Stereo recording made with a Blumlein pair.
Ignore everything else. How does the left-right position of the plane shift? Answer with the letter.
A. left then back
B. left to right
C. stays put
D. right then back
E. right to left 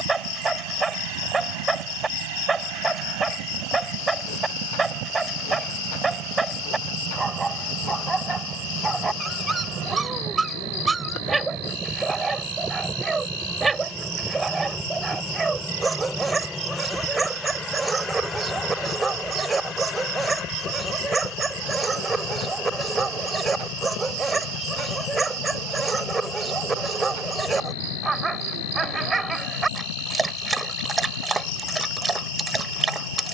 E.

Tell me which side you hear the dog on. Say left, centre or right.
centre.